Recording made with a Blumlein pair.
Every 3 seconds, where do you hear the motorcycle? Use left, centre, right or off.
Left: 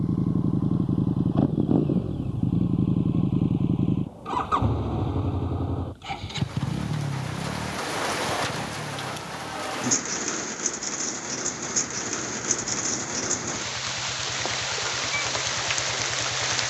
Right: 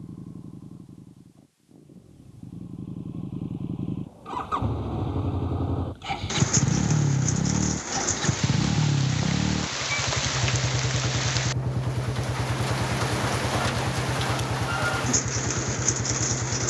left, centre, right, right, right, right.